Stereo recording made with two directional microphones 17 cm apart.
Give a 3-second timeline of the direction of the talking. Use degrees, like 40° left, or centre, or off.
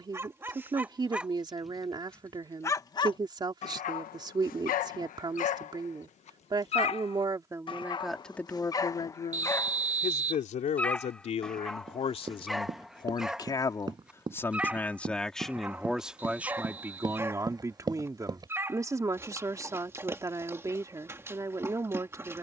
20° right, 20° right, 10° right, 40° left, 20° left, 10° right, 20° right, 20° right.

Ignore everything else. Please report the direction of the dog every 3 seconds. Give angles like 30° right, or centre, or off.
centre, 50° left, 30° left, 10° left, centre, 10° right, 10° right, 10° right.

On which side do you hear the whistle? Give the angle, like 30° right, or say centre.
50° right.